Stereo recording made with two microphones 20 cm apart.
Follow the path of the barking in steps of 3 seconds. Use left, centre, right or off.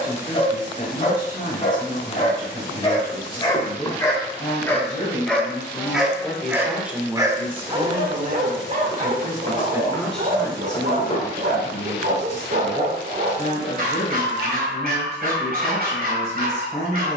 left, centre, right, right, right, right.